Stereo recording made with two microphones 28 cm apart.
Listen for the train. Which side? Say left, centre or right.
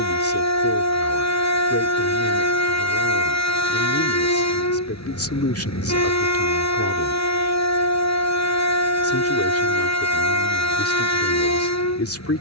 left.